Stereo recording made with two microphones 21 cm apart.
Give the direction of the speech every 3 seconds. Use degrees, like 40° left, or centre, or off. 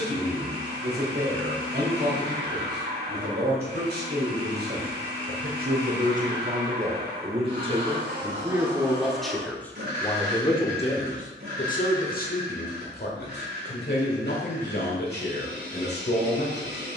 60° right, 50° right, 30° right, 20° left, 60° left, 60° left.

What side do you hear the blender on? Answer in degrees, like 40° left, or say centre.
60° right.